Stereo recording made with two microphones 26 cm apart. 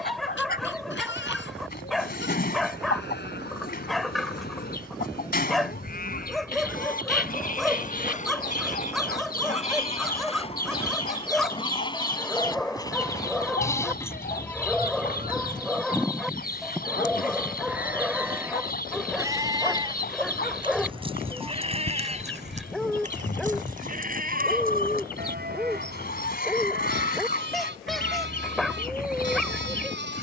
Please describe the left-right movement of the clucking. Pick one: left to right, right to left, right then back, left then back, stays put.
stays put.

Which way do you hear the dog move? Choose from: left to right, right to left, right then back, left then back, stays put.
stays put.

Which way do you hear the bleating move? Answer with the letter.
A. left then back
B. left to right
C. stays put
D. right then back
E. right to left
B.